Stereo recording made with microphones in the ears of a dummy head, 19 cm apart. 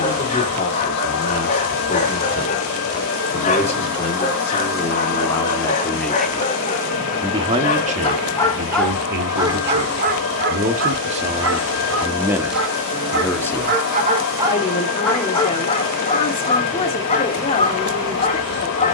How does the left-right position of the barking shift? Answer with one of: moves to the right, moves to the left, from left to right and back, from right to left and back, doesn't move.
from left to right and back.